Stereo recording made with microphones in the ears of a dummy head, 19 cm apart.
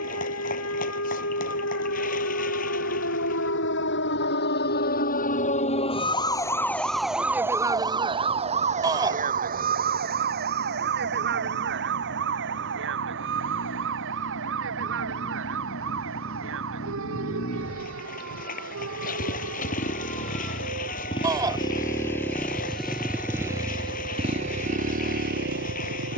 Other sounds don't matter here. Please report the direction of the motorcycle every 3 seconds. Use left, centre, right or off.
left, left, left, left, left, left, left, centre, right.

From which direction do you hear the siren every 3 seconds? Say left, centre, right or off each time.
left, left, centre, right, right, right, right, right, right.